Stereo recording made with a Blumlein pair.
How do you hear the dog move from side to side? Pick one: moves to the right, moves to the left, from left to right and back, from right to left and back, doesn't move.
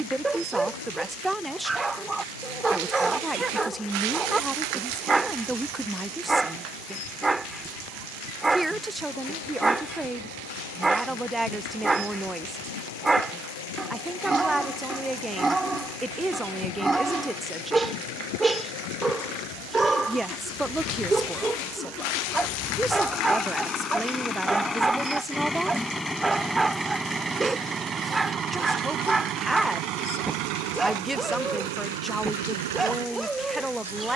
doesn't move.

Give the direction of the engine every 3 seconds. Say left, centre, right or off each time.
left, left, left, left, left, left, left, left, centre, right, right, right.